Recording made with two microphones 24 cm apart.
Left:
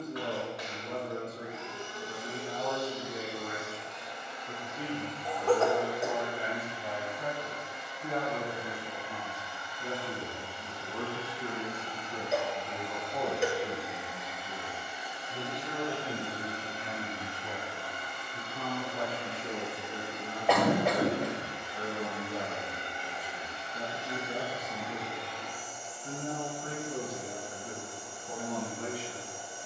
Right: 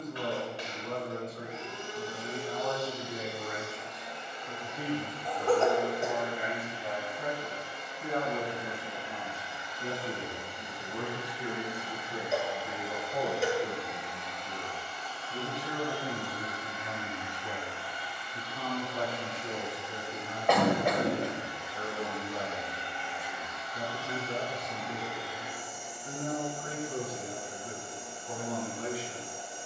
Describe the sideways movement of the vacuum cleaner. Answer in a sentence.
In this clip you hear the vacuum cleaner go left and come back.